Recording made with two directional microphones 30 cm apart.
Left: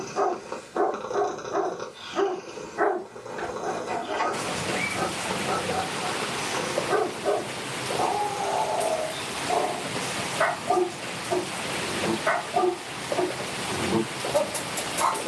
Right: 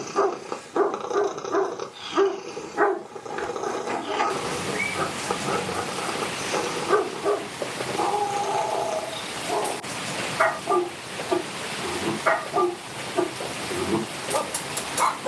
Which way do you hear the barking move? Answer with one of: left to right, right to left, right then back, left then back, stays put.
stays put.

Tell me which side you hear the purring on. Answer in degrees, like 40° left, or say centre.
40° right.